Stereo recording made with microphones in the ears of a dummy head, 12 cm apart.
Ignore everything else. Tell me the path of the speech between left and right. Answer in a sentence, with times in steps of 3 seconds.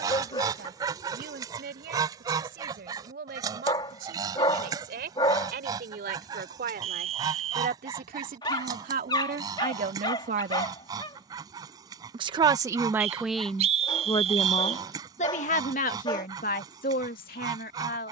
In this clip you hear the speech on the right from 0 s, in the centre from 12 s and on the left from 15 s.